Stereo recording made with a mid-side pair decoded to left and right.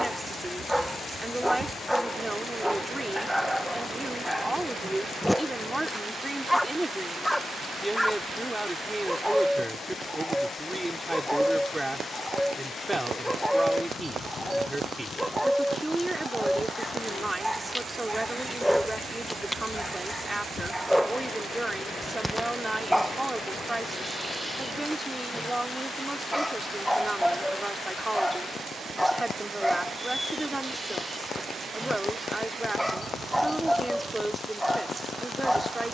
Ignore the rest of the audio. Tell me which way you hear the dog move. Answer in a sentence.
In this clip you hear the dog stay in one place.